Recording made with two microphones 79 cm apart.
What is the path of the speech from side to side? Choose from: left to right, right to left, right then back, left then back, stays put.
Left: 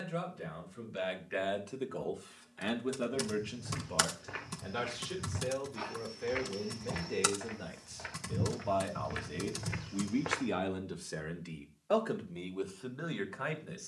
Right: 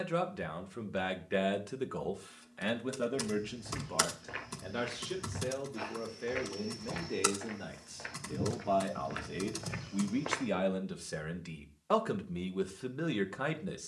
left then back.